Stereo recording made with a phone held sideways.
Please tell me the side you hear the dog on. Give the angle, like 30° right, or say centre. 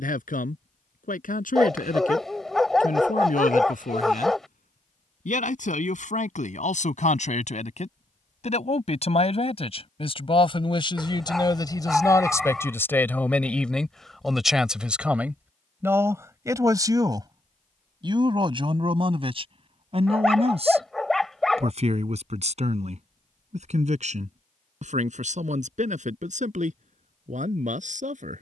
centre.